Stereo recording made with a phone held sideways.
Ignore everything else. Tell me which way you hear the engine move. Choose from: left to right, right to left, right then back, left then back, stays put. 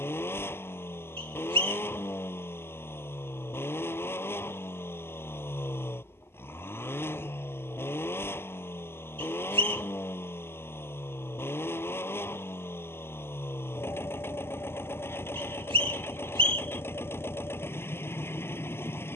stays put.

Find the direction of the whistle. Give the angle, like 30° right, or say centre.
40° right.